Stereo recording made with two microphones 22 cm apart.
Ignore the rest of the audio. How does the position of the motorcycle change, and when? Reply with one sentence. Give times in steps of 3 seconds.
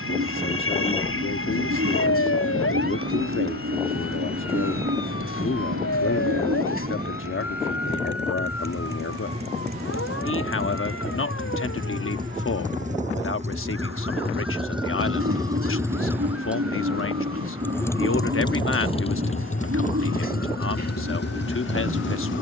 In this clip you hear the motorcycle on the right from 0 s, in the centre from 15 s and on the left from 18 s.